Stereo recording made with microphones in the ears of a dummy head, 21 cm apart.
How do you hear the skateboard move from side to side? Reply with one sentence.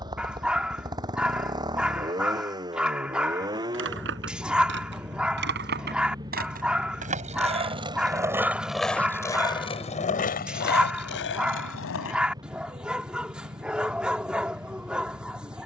You can hear the skateboard travel towards the left.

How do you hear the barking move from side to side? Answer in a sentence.
You can hear the barking stay put.